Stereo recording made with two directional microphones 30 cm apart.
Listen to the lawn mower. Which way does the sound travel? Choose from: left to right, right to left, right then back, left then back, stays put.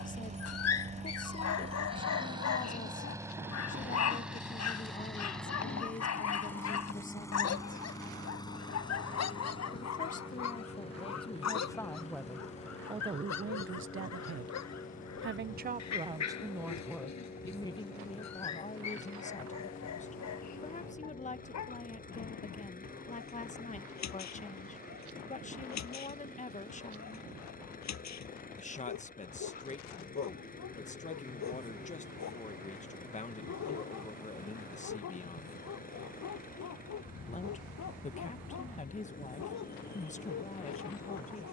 right to left.